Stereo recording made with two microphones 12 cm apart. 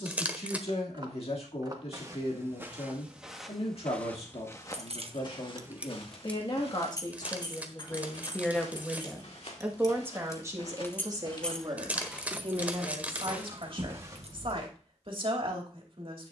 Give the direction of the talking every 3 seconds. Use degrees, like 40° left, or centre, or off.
60° left, 60° left, 30° left, 30° right, 50° right, 50° right.